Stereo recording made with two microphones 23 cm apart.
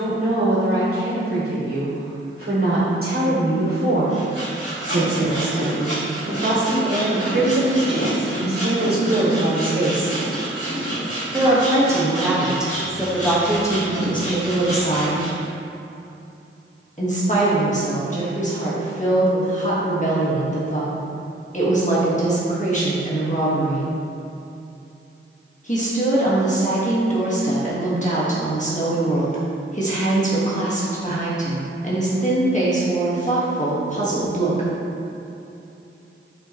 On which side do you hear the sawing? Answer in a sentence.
You can hear the sawing on the left.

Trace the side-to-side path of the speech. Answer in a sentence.
You can hear the speech travel towards the left.